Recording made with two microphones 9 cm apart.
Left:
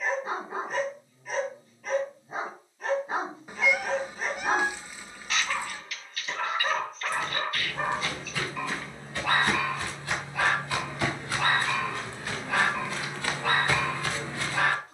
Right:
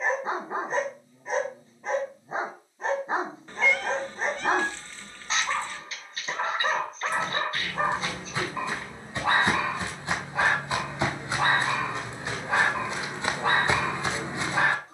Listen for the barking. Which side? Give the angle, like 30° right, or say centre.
30° right.